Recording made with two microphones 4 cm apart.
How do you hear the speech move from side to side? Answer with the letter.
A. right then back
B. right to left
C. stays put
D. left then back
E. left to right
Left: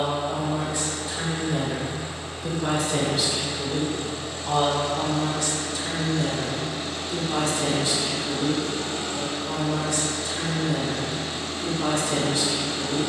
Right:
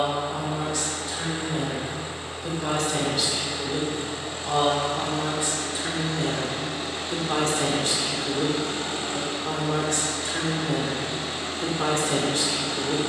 E.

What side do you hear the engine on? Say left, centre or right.
right.